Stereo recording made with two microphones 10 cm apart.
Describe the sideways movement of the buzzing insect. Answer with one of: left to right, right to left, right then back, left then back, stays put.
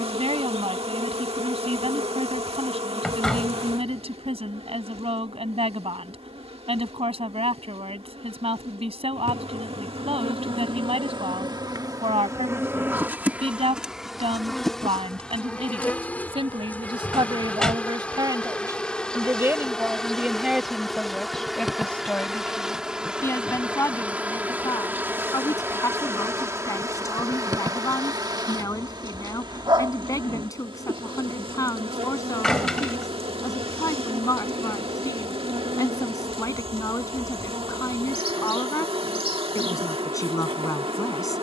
left then back.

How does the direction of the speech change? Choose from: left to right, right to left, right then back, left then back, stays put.
right to left.